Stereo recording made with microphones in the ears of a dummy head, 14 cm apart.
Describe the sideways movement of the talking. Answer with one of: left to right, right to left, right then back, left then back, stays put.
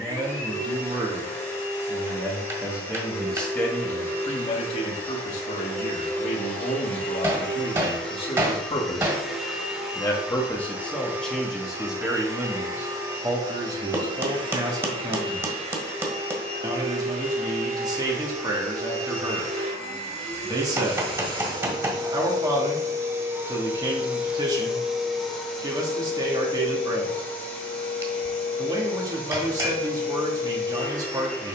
left then back.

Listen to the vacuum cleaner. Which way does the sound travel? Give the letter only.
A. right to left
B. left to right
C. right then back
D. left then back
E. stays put
C.